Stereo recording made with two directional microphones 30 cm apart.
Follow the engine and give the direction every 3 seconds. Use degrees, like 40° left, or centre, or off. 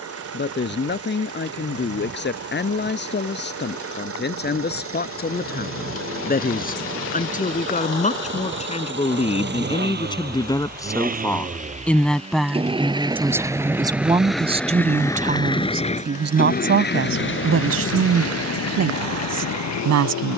50° right, 50° right, 40° right, 30° right, 10° right, 30° left, 60° left.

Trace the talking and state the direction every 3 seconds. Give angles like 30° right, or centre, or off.
40° left, 30° left, 30° left, 10° left, 10° right, 40° right, 60° right.